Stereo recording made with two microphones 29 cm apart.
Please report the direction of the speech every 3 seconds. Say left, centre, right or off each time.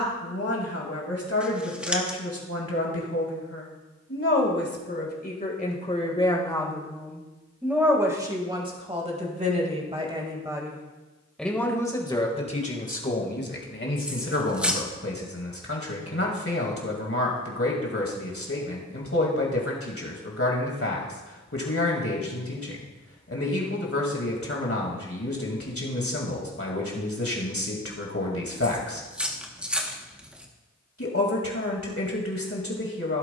left, left, centre, centre, left, left, left, left, left, left, left.